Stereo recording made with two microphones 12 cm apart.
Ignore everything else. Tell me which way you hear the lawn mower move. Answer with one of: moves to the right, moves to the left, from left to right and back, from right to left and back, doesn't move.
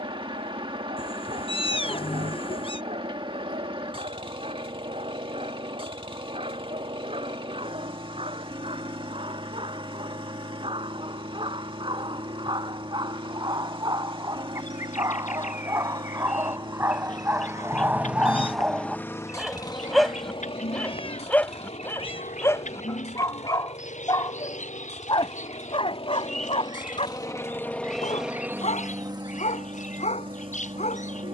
from right to left and back.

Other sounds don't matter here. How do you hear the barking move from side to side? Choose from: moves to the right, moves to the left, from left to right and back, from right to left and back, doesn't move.
moves to the left.